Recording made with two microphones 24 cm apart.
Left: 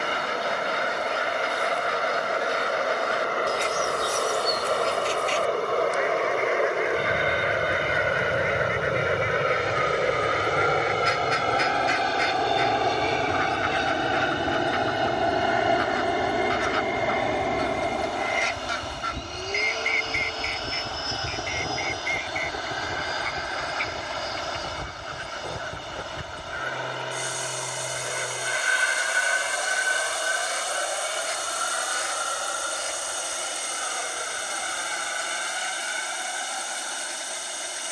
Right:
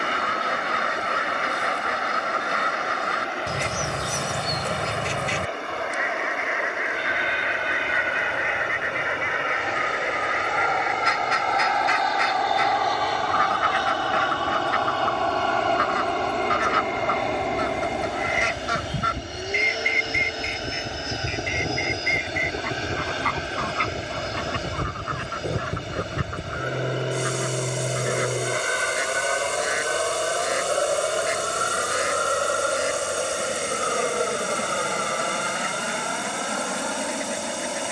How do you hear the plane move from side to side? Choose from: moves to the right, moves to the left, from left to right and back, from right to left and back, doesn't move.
moves to the right.